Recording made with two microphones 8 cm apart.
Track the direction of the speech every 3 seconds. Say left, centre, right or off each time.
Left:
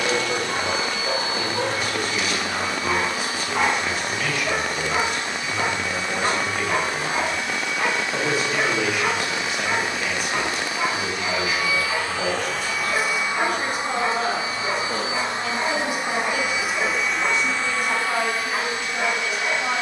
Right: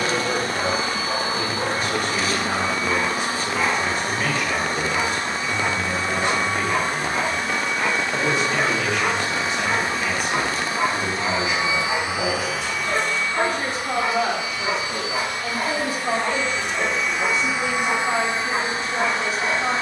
right, right, centre, centre, right, right, right.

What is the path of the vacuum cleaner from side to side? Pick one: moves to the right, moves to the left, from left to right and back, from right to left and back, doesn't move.
from right to left and back.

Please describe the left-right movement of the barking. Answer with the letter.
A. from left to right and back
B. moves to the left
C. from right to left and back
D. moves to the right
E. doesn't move
D.